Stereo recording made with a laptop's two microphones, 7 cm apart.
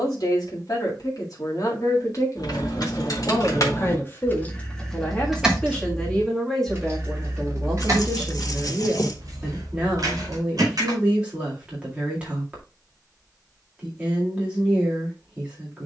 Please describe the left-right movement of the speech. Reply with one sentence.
You can hear the speech move to the right.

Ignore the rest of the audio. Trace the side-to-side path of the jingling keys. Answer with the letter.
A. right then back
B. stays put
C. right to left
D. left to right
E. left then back
D.